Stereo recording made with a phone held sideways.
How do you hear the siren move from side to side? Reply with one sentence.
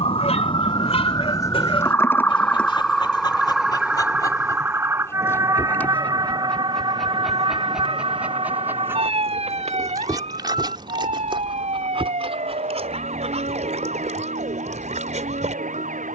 In this clip you hear the siren move from left to right.